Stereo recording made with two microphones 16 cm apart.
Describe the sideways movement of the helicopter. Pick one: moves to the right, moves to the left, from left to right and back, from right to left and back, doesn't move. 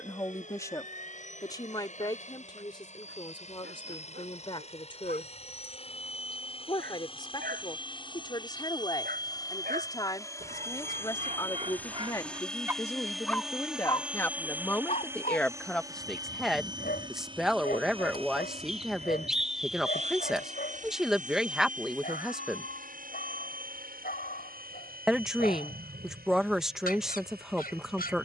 moves to the right.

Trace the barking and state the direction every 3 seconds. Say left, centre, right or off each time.
right, right, right, right, centre, left, left, left, left, left.